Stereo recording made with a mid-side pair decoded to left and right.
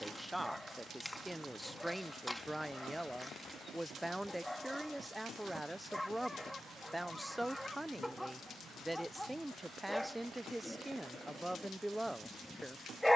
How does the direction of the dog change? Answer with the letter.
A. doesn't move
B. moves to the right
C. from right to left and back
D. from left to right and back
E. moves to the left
A.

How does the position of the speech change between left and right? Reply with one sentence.
In this clip you hear the speech stay put.